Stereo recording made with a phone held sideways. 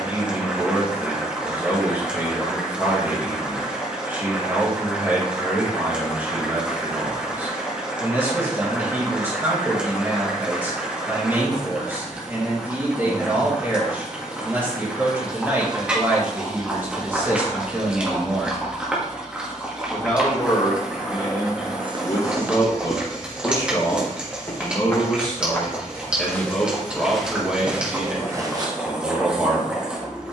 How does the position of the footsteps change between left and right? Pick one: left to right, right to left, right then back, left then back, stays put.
left then back.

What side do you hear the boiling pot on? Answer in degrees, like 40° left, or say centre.
10° right.